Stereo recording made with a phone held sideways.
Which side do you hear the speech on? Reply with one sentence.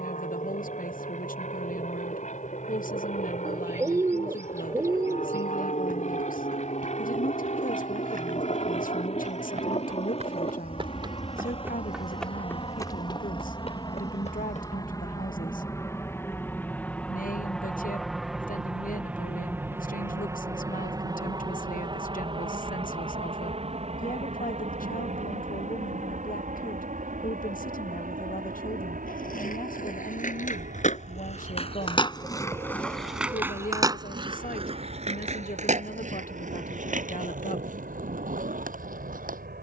In this clip you hear the speech on the left.